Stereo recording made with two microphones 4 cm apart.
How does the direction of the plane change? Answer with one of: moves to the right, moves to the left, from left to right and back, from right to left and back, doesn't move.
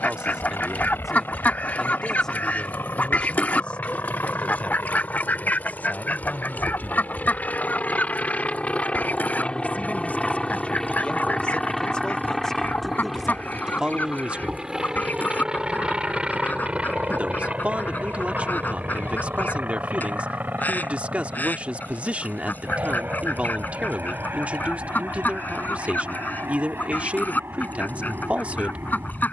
moves to the right.